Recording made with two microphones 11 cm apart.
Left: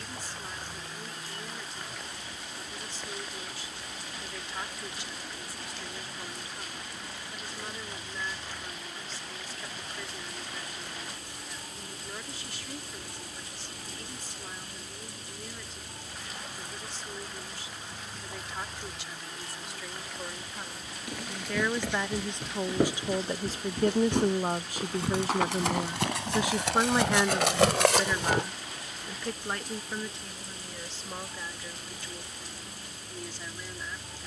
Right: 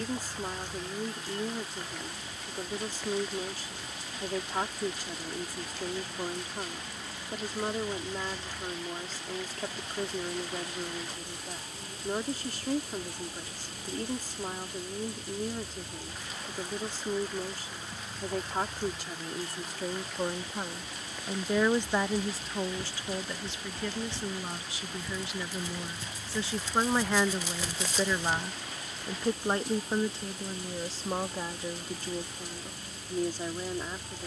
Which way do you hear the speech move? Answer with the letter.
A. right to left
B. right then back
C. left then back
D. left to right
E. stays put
C.